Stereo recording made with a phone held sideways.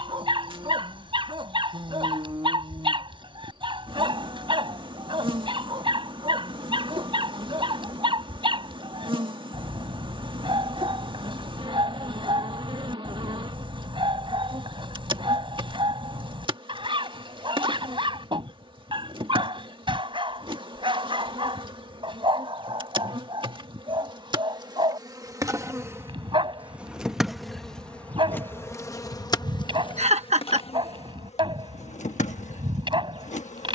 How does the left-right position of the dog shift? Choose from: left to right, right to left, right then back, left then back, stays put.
stays put.